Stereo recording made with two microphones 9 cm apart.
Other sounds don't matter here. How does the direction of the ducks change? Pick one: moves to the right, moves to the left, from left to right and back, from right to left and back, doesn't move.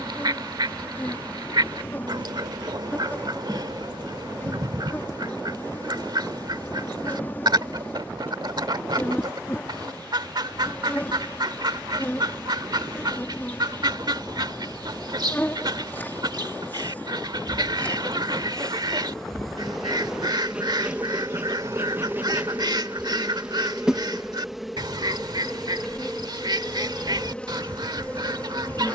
doesn't move.